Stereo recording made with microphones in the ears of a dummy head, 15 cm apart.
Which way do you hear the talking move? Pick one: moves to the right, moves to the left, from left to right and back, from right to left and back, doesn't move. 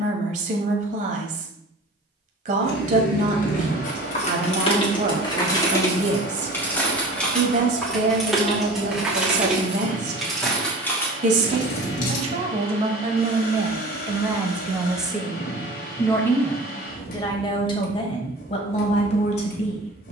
moves to the left.